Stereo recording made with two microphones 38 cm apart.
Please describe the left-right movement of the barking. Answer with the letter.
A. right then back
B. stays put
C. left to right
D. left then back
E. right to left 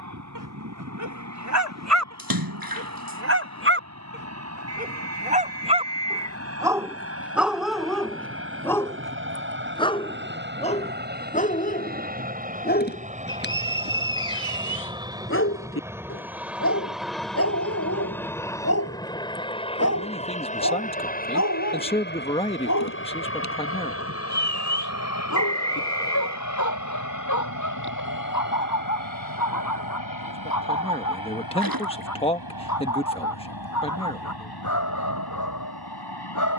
E.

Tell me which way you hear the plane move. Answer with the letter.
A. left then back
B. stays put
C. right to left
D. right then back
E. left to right
C.